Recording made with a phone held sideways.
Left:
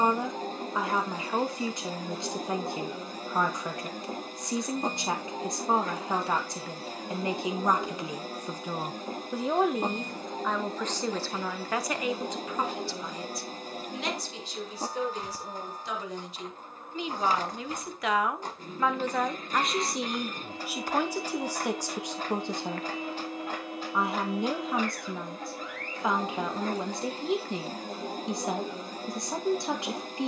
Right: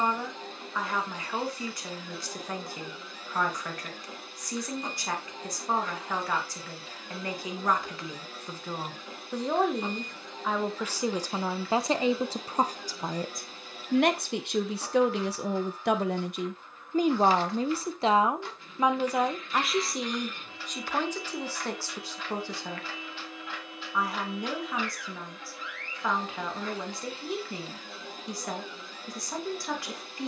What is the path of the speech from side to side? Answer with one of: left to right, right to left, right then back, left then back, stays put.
right then back.